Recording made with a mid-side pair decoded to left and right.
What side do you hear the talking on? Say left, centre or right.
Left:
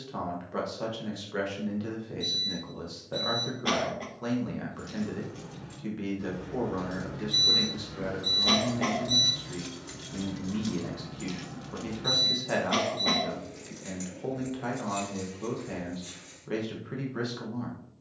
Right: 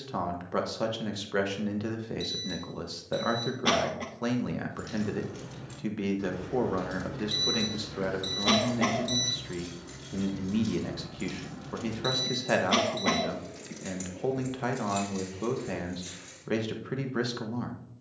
right.